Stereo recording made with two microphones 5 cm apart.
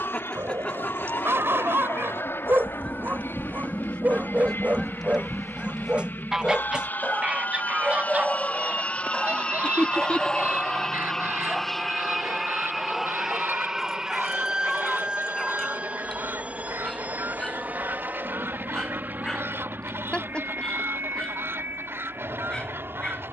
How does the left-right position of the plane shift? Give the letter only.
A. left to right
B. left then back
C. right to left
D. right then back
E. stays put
A.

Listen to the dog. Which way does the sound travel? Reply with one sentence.
You can hear the dog move to the left.